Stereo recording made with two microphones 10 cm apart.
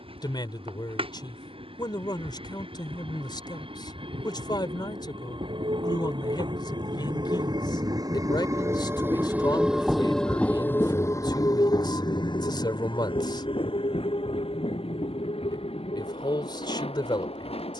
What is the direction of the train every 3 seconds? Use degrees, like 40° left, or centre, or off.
70° right, 60° right, 50° right, 10° left, 60° left, 80° left.